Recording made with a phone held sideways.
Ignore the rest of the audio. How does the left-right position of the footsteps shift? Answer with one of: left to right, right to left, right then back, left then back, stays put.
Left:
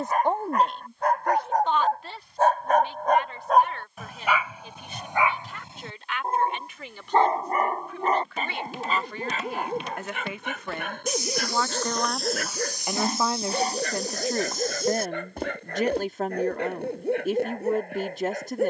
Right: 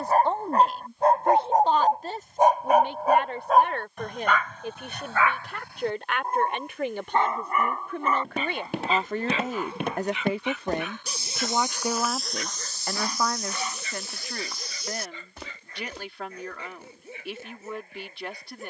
right to left.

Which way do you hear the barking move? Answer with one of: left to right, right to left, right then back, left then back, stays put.
right to left.